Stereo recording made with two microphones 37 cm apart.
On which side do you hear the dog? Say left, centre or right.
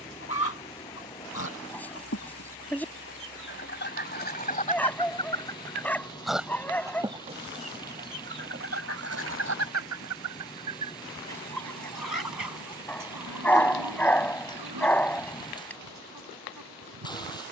centre.